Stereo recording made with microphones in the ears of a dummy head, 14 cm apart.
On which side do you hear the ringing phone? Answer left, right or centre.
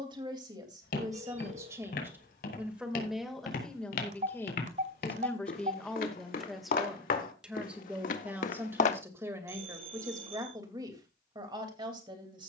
right.